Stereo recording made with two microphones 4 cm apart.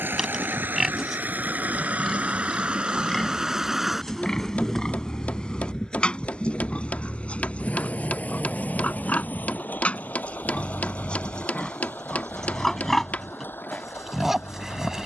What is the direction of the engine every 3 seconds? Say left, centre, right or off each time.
right, centre, left, left, left.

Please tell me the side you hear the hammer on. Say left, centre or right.
left.